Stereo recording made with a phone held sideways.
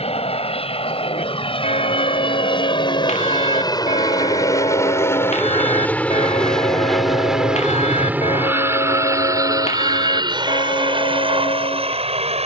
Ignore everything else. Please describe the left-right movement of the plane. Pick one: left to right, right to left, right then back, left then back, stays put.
left to right.